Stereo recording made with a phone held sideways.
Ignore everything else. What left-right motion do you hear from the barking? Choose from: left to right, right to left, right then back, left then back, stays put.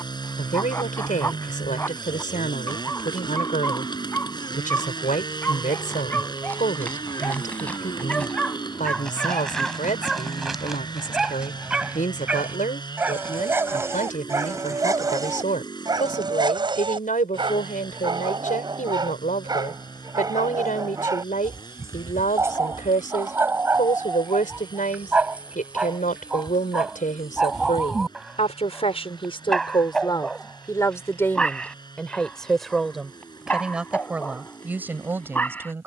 right then back.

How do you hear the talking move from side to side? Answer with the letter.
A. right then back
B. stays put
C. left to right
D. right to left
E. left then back
C.